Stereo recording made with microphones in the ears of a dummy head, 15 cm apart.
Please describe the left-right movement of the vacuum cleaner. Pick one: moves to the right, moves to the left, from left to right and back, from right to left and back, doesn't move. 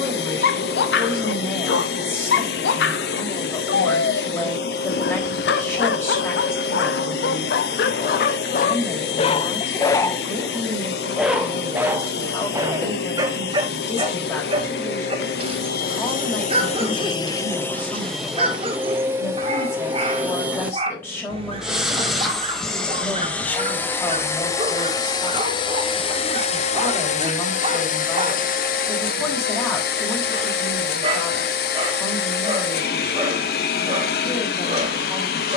from left to right and back.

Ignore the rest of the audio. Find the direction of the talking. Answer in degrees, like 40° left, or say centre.
10° left.